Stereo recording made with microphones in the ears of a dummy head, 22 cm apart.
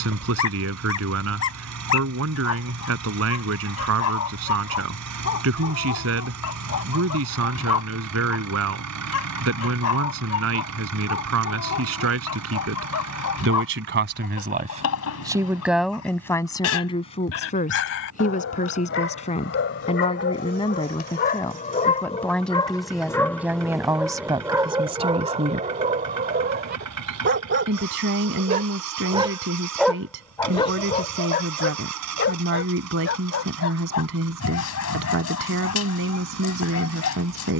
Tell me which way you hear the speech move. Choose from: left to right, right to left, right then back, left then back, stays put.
left then back.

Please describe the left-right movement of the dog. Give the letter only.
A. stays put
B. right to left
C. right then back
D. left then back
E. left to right
C.